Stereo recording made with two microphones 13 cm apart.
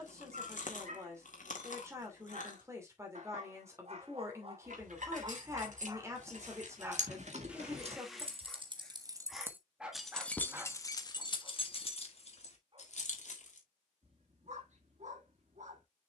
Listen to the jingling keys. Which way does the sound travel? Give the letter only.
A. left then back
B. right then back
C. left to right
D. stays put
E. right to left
E.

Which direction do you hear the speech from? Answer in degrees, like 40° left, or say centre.
20° right.